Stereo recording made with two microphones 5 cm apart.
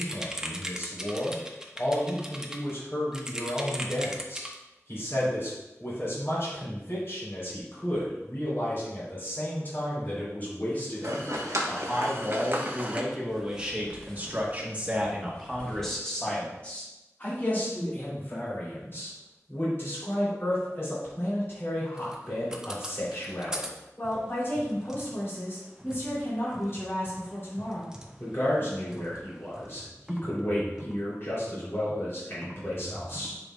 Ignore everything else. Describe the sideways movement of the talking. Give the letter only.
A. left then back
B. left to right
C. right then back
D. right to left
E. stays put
C.